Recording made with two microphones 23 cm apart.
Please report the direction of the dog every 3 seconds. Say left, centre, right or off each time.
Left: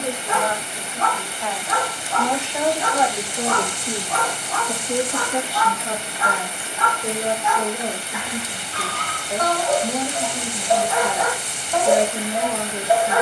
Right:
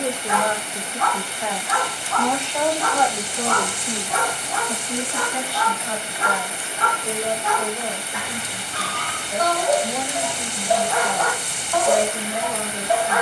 left, centre, right, centre, left.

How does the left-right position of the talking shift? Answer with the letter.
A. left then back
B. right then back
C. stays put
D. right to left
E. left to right
D.